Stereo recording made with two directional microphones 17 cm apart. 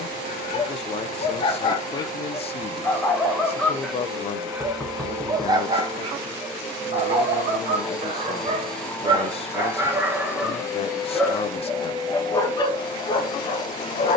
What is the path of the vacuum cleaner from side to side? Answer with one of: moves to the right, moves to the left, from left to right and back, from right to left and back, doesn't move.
moves to the left.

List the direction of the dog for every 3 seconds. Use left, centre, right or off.
left, centre, right, centre, left.